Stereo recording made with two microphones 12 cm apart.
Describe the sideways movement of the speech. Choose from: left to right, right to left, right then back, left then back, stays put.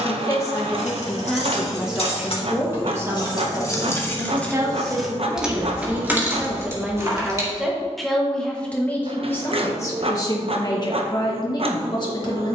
right then back.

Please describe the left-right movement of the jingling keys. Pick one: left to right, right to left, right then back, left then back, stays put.
left to right.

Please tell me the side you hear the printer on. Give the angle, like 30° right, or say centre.
50° right.